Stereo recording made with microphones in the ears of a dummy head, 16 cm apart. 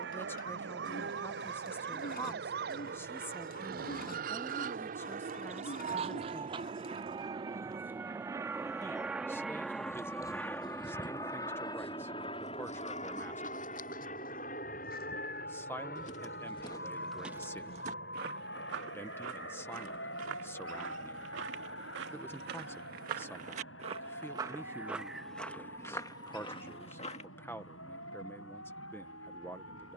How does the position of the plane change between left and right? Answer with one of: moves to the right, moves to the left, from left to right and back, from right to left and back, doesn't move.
moves to the left.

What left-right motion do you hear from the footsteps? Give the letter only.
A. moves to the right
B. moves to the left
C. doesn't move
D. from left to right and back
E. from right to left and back
D.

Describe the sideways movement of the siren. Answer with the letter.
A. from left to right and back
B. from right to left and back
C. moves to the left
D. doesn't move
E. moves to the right
C.